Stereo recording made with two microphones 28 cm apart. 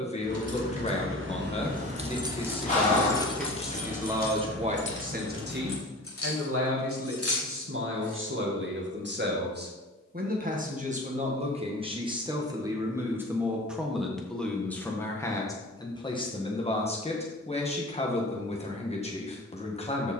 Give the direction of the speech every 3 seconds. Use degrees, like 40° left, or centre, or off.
20° left, 20° right, 40° right, 30° right, centre, 20° left, 20° left.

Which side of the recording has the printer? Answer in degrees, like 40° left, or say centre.
20° left.